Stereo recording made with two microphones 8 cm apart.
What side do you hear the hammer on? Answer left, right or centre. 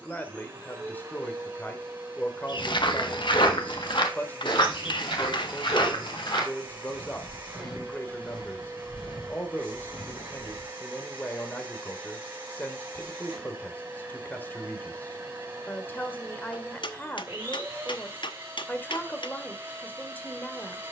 left.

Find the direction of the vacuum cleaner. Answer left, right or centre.
right.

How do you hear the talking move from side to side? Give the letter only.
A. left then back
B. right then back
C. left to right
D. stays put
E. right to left
D.